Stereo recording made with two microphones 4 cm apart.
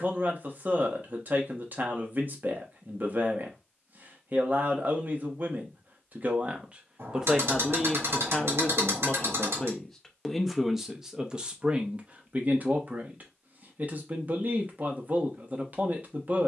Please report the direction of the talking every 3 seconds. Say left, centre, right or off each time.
right, right, centre, centre, right, right.